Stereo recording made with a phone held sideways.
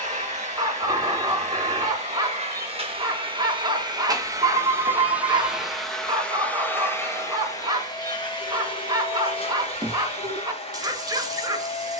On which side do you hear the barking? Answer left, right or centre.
right.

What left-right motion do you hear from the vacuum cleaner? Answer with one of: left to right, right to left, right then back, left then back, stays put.
right to left.